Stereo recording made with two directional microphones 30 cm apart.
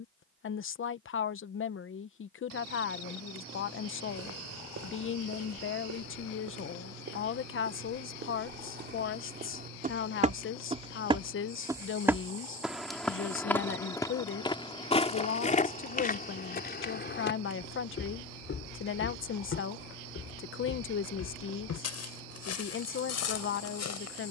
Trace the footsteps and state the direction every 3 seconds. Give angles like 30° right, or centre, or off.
off, 50° right, 40° right, 20° right, 10° left, 30° left, 50° left, 60° left.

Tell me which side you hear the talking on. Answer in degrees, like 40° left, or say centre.
40° left.